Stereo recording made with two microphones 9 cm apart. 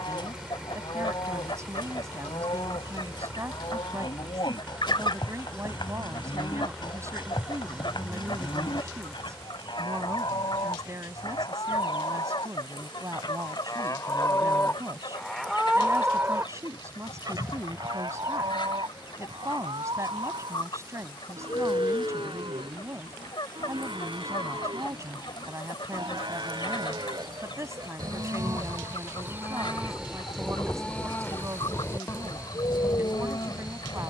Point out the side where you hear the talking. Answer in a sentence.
You can hear the talking on the right.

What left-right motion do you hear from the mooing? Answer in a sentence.
In this clip you hear the mooing move from left to right and back again.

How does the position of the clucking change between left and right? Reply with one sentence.
In this clip you hear the clucking stay in one place.